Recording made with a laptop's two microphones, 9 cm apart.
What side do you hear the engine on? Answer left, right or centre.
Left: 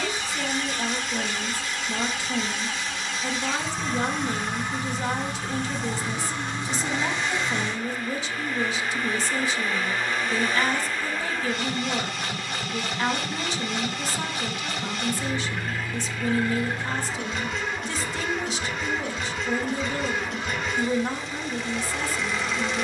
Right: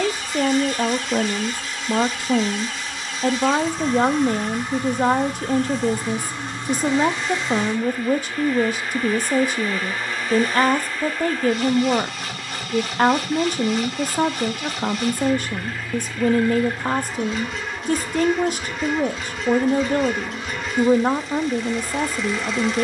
centre.